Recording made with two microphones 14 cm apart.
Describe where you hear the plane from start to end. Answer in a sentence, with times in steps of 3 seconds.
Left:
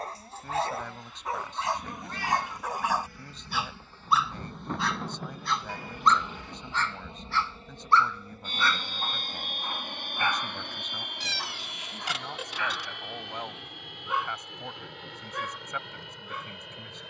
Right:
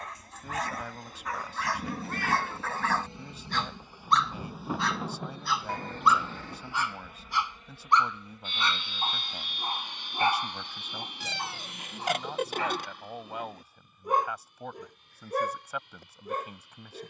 In this clip you hear the plane on the right from 0 s, in the centre from 3 s and on the left from 6 s.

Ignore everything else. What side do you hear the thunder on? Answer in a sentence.
In this clip you hear the thunder in the centre.